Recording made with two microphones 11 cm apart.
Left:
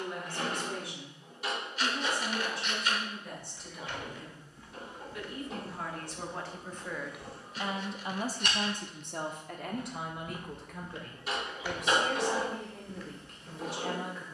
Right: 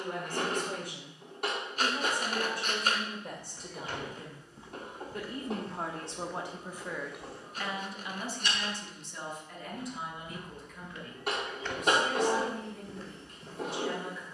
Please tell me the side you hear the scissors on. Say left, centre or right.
right.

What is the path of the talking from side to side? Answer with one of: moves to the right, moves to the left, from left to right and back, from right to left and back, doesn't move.
moves to the left.